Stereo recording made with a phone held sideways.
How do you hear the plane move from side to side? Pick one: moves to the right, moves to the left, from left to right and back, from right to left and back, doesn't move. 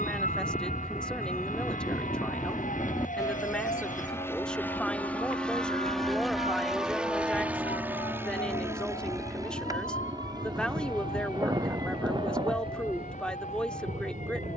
moves to the right.